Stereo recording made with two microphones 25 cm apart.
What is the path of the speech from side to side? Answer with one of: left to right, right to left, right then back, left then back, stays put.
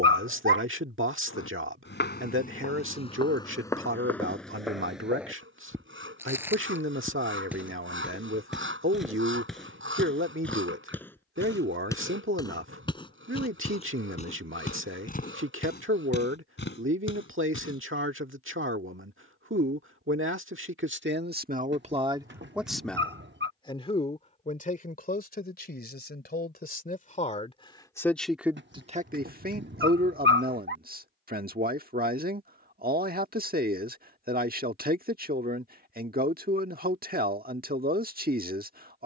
left then back.